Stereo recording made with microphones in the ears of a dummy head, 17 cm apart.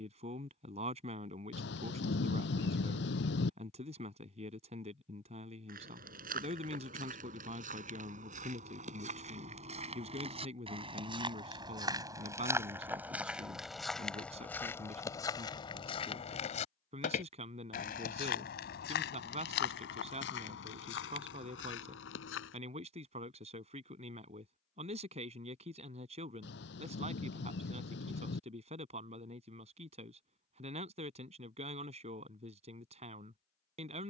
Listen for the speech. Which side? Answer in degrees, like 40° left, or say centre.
30° right.